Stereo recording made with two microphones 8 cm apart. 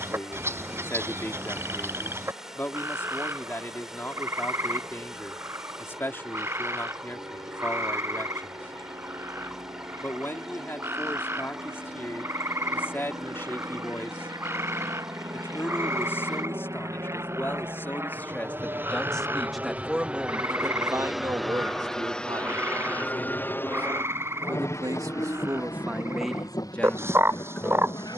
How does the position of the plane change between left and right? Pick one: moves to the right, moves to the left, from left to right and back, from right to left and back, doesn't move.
moves to the left.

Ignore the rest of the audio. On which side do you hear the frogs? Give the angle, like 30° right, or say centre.
30° right.